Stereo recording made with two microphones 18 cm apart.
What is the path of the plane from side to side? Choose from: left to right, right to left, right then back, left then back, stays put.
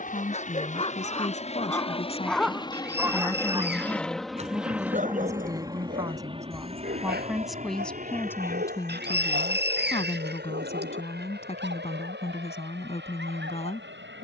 left to right.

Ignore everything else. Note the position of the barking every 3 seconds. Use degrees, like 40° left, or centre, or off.
20° left, 40° right, 70° right, 70° right, 80° right.